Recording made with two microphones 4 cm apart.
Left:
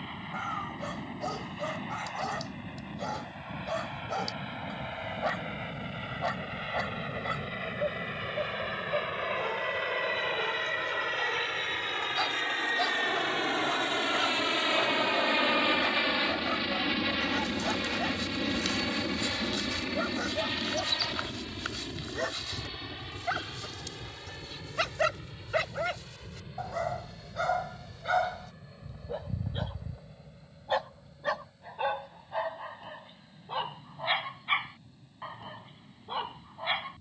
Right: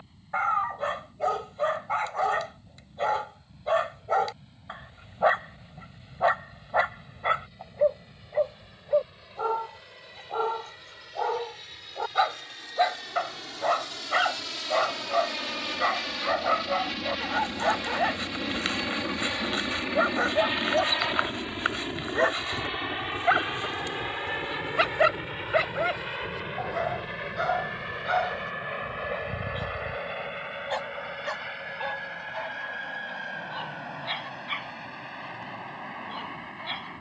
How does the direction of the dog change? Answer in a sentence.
In this clip you hear the dog move to the left.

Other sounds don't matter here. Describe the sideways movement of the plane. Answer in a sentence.
You can hear the plane move from left to right.